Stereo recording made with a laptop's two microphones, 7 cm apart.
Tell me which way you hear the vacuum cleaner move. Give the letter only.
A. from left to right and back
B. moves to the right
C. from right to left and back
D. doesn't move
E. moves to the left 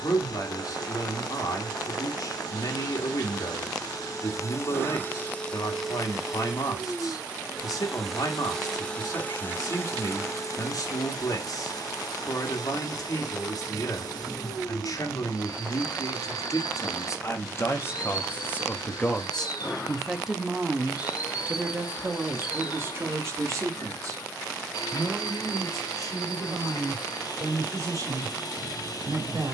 A.